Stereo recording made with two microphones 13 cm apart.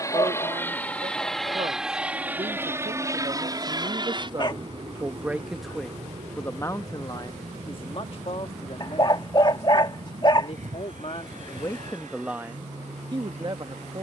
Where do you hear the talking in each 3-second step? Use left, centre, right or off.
right, right, left, left, right.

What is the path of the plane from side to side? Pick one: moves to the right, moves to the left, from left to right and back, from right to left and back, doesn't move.
moves to the right.